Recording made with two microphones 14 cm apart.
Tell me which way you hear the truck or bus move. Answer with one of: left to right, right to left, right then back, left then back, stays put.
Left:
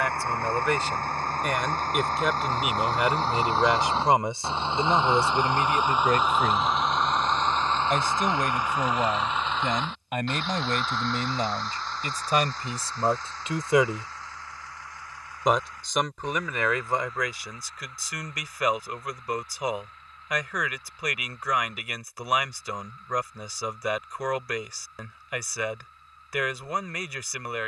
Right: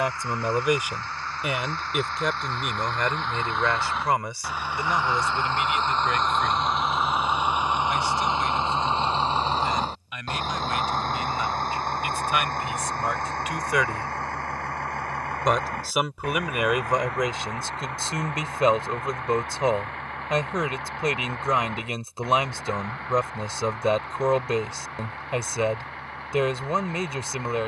left to right.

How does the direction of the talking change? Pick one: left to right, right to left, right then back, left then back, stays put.
left then back.